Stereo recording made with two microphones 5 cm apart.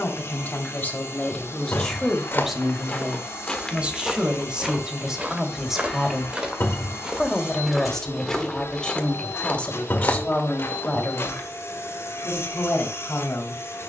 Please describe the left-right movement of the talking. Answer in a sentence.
In this clip you hear the talking move from left to right and back again.